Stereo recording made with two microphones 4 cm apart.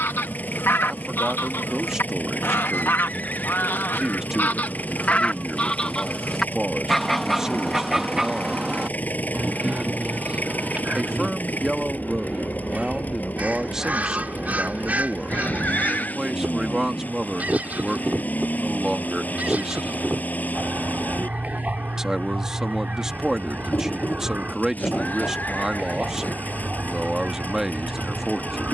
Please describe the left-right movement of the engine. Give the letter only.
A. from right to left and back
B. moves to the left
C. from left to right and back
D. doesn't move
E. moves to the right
D.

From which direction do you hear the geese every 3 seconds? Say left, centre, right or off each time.
left, left, centre, right, right, right, right, right, right, right.